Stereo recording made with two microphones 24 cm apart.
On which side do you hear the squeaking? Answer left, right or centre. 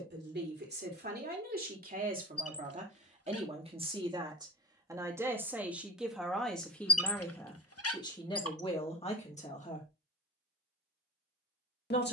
left.